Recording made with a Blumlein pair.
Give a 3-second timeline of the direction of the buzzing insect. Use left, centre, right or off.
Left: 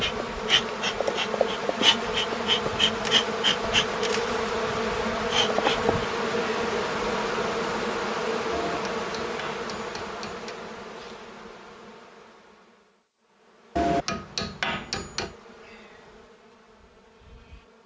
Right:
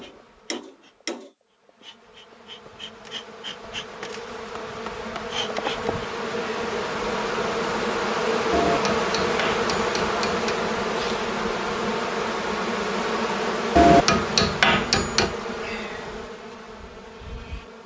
left, left, centre, right, right, right.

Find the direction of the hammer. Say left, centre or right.
right.